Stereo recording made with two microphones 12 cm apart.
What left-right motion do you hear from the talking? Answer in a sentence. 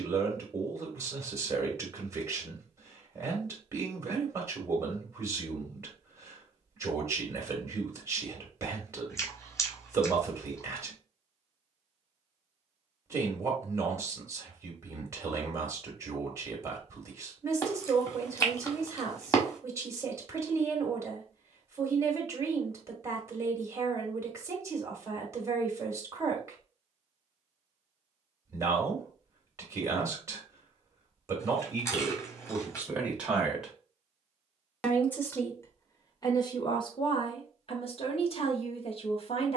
In this clip you hear the talking move to the left.